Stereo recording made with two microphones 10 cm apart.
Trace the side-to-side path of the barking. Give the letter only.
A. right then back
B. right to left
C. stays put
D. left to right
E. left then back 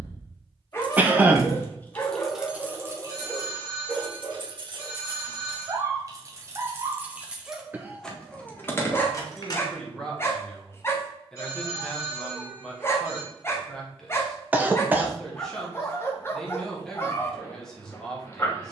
A.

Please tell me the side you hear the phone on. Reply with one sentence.
You can hear the phone on the left.